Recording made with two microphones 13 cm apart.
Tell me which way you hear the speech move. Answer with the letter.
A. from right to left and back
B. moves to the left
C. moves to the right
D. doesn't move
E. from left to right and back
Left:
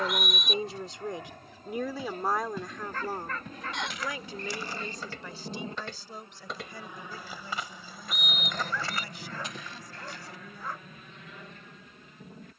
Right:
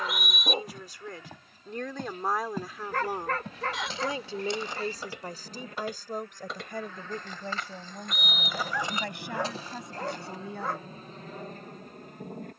C.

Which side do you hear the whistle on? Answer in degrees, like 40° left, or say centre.
centre.